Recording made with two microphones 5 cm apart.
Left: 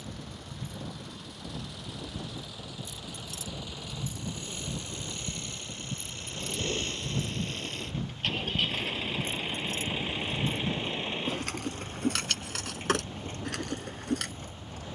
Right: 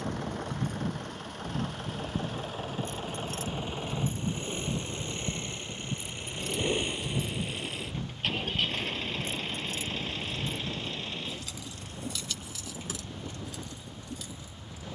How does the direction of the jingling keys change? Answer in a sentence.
In this clip you hear the jingling keys move to the left.